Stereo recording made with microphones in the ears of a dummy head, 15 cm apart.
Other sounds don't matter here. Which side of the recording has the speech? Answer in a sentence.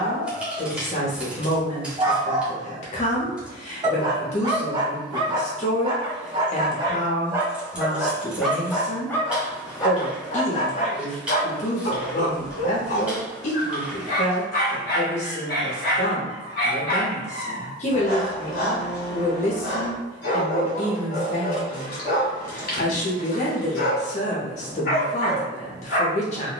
You can hear the speech on the left.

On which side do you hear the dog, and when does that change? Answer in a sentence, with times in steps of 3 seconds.
You can hear the dog on the right from 0 s, in the centre from 6 s and on the left from 9 s.